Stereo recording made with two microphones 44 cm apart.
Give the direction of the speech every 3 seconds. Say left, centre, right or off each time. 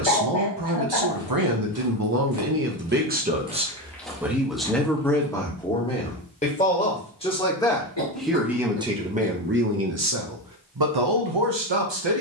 right, centre, centre, right.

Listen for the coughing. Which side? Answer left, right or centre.
left.